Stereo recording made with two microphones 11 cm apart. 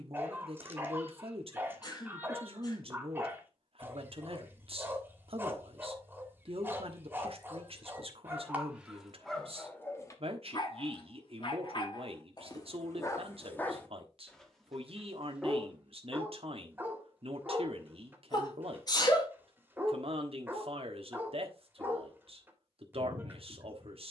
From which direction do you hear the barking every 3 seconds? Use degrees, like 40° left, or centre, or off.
20° right, 20° right, 20° right, 30° left, 20° left, 20° right, 20° right, 20° right.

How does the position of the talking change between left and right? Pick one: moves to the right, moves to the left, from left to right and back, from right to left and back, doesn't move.
doesn't move.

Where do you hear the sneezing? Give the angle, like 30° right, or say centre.
40° left.